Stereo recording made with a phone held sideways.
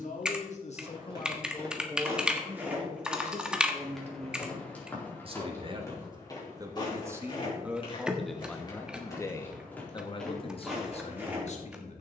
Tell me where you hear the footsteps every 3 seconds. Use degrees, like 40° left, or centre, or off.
20° right, 10° left, 30° left, centre.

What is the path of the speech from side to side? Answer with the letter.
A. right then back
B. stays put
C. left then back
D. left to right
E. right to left
A.